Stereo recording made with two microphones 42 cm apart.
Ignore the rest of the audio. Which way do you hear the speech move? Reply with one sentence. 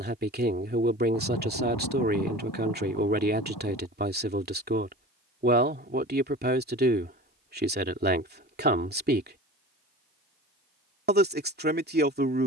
In this clip you hear the speech stay in one place.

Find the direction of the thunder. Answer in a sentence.
You can hear the thunder on the left.